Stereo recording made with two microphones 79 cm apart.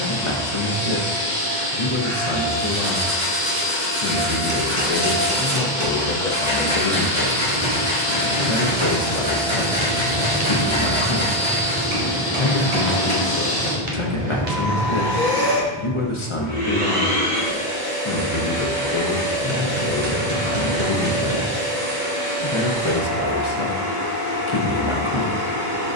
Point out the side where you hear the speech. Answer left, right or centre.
left.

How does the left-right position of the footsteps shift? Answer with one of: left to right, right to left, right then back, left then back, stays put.
left to right.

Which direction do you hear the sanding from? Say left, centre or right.
right.